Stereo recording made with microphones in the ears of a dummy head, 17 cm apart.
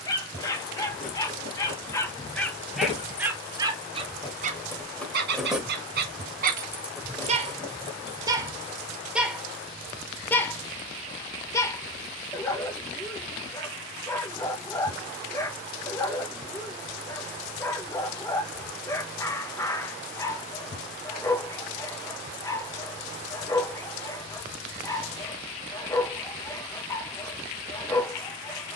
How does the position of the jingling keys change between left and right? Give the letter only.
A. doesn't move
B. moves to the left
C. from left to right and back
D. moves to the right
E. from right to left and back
C.